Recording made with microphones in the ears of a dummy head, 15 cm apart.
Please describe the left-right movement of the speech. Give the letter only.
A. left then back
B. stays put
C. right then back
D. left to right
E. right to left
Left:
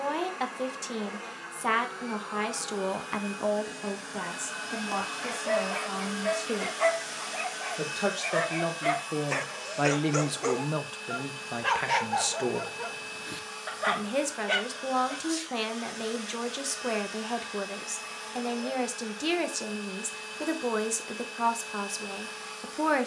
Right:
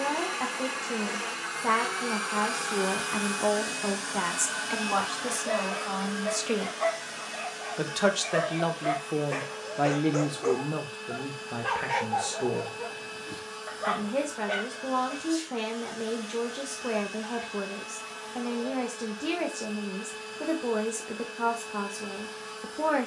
C.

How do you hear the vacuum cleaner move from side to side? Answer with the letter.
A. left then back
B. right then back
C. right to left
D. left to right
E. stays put
C.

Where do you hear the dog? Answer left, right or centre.
left.